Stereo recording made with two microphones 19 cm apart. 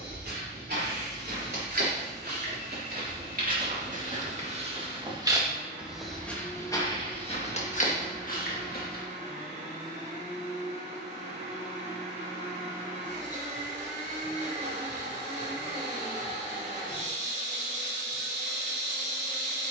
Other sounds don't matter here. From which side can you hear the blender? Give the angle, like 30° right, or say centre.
40° right.